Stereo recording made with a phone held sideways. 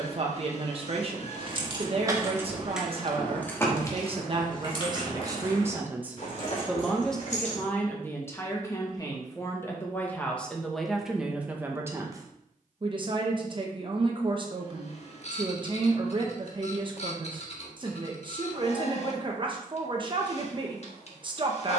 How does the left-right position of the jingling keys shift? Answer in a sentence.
You can hear the jingling keys move from right to left.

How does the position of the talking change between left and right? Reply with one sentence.
You can hear the talking move from right to left and back again.